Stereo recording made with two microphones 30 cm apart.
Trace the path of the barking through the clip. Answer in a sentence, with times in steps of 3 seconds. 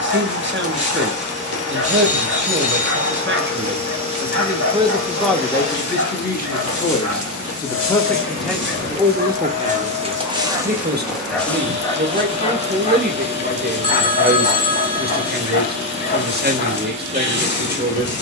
You can hear the barking on the right from 0 s, in the centre from 9 s and on the left from 12 s.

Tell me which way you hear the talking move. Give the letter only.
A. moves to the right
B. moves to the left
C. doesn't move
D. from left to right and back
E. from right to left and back
E.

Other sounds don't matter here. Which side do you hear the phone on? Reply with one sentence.
You can hear the phone on the left.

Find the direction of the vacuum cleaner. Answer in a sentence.
In this clip you hear the vacuum cleaner on the left.